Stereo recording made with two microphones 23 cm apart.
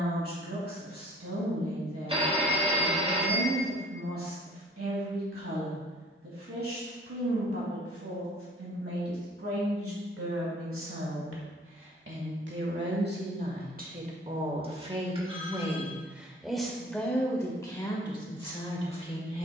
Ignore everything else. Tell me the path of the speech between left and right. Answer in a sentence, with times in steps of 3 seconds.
In this clip you hear the speech on the right from 0 s, in the centre from 15 s and on the left from 18 s.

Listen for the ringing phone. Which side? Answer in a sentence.
You can hear the ringing phone on the right.